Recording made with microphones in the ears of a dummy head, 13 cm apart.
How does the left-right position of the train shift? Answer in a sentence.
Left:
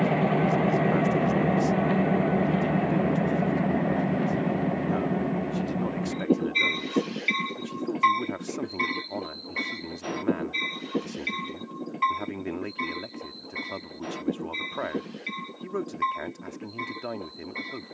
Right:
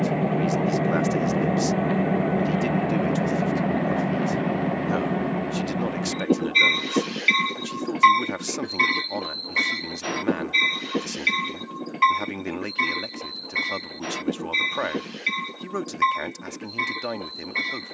In this clip you hear the train travel towards the right.